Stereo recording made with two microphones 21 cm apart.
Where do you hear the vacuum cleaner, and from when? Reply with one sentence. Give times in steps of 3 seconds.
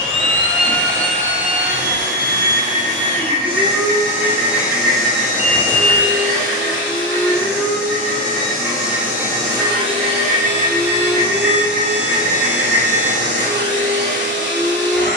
In this clip you hear the vacuum cleaner on the right from 0 s, in the centre from 3 s and on the right from 9 s.